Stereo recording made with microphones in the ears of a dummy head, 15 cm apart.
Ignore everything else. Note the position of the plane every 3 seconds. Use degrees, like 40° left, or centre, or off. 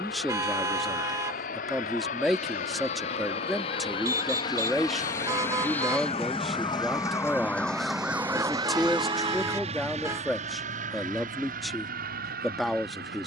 50° left, 30° left, 10° right, 40° right, 50° right.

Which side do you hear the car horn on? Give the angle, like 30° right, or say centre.
20° right.